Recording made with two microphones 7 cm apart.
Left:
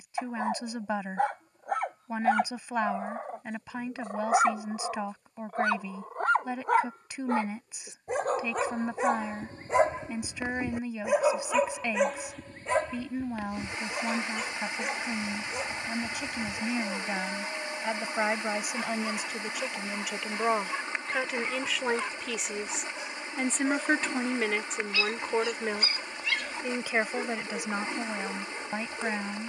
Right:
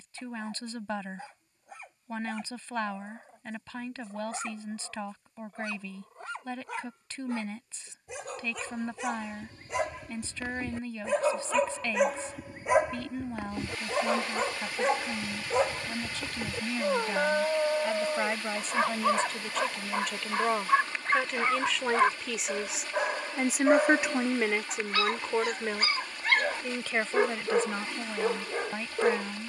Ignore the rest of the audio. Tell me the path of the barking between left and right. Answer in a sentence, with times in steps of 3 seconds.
In this clip you hear the barking on the left from 0 s and on the right from 12 s.